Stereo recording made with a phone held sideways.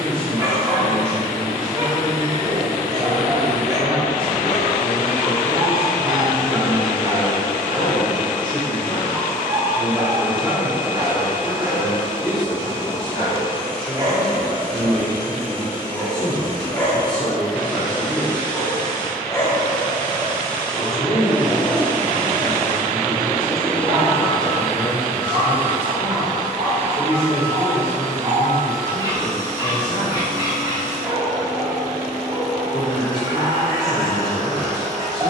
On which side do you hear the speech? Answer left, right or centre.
left.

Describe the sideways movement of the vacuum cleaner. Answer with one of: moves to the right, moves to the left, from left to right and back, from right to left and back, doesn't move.
moves to the right.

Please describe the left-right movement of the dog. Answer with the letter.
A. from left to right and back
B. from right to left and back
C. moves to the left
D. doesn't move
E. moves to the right
B.